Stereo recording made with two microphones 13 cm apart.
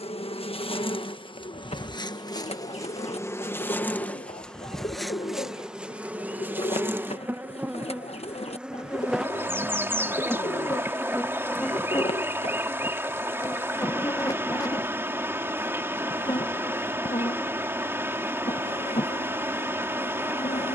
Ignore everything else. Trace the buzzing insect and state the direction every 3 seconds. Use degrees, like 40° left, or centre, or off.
40° left, 10° left, 10° right, centre, 20° left, 40° left, 50° left.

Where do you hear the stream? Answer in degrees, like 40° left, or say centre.
20° right.